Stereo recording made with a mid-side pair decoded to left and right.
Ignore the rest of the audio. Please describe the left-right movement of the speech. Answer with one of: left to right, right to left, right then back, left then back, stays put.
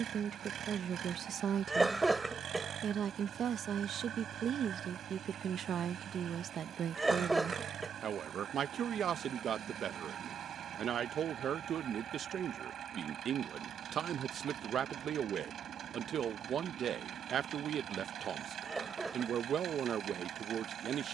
stays put.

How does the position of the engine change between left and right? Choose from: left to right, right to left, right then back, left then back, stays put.
stays put.